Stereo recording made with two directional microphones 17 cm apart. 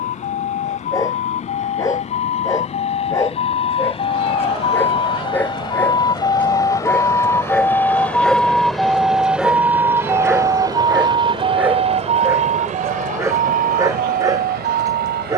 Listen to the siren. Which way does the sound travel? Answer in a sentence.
In this clip you hear the siren move from left to right.